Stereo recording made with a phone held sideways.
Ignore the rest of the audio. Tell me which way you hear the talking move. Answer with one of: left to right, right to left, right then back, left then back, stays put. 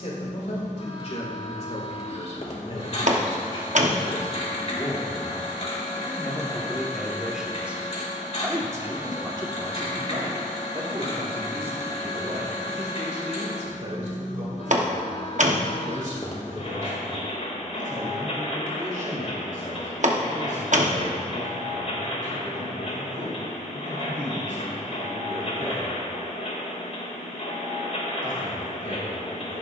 left to right.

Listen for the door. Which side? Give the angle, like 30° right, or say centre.
60° right.